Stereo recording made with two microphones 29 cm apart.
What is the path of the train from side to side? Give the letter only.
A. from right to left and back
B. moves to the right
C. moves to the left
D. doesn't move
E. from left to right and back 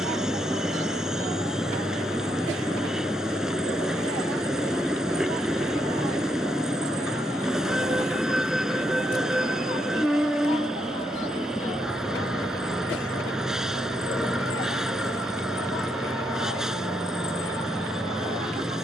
D.